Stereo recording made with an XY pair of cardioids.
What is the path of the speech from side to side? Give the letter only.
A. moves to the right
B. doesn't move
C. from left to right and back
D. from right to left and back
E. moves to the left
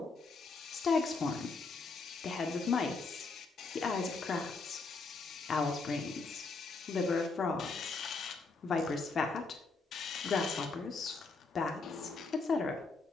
B.